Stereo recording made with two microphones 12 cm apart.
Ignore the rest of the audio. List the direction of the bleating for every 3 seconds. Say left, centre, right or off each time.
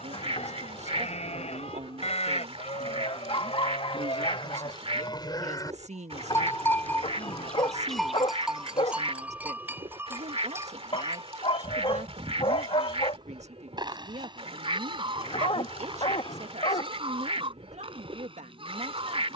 left, left, centre, right, right, right, right.